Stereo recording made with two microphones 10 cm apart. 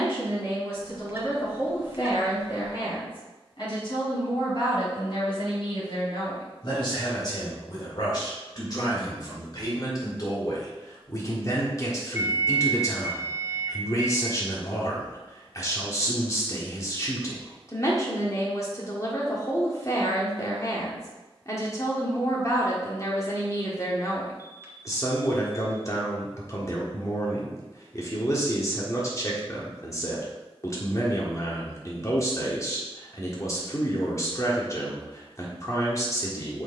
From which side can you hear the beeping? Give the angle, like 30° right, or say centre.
30° right.